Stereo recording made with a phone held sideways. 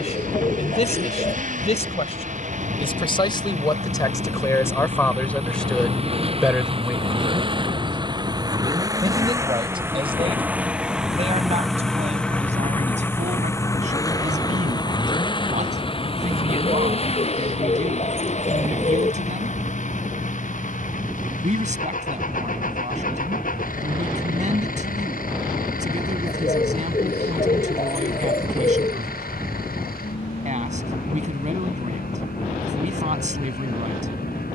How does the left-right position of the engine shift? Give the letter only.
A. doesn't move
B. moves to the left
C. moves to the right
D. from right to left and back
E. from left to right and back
B.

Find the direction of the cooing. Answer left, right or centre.
left.